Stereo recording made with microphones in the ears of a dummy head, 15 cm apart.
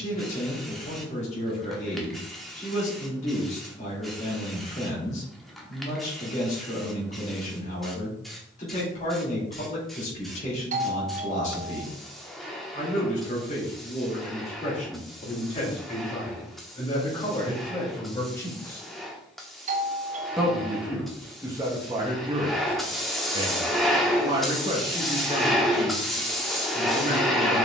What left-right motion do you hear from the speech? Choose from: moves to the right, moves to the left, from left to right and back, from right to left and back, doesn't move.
moves to the right.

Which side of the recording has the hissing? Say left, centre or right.
centre.